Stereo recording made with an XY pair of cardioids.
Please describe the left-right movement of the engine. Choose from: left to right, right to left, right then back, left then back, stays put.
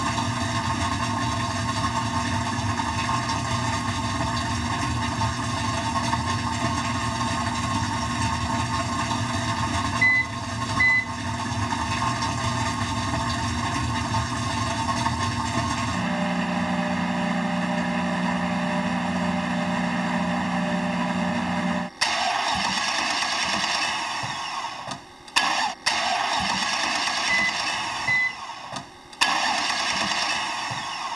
stays put.